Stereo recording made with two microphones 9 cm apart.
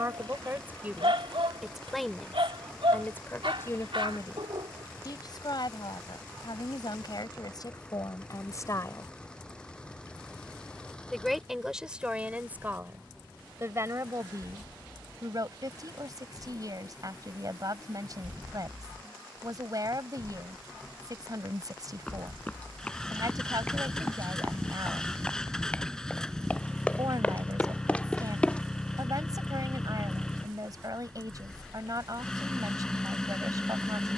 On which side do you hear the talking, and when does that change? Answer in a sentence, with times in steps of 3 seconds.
You can hear the talking in the centre from 0 s, on the left from 3 s, in the centre from 9 s and on the right from 12 s.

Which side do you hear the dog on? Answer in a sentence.
You can hear the dog on the right.